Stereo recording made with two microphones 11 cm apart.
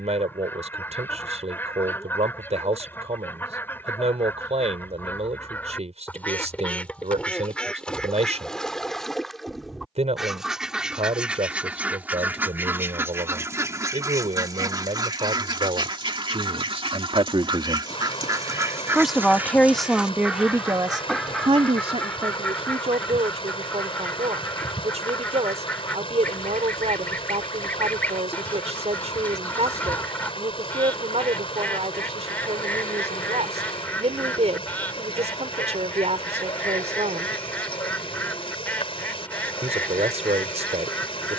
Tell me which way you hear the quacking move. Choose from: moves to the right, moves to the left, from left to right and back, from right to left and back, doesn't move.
from left to right and back.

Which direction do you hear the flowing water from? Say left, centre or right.
left.